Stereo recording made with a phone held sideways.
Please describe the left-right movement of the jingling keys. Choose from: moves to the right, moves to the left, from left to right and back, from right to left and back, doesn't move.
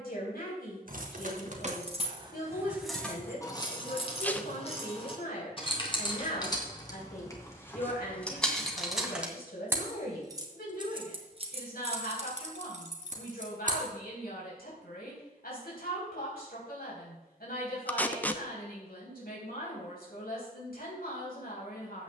from right to left and back.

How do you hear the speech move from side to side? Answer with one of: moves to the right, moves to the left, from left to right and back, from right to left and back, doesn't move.
doesn't move.